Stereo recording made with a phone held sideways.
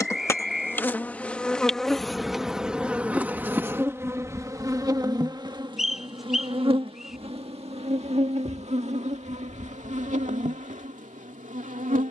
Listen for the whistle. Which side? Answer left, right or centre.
centre.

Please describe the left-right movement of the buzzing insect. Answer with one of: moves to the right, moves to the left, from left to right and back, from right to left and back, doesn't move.
moves to the right.